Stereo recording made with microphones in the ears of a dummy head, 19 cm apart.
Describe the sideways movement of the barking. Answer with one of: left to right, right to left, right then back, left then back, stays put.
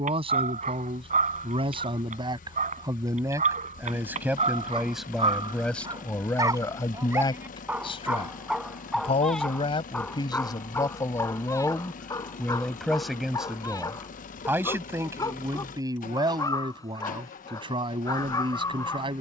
right to left.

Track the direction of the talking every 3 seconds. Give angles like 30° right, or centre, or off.
20° right, 10° right, 20° left, 20° left, centre, 20° right, 20° right.